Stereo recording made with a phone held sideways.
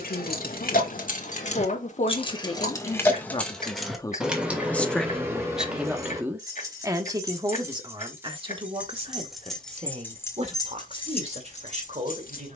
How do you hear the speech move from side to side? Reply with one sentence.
You can hear the speech move from left to right.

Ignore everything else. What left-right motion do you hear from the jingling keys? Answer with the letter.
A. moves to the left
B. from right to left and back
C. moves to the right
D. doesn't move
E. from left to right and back
E.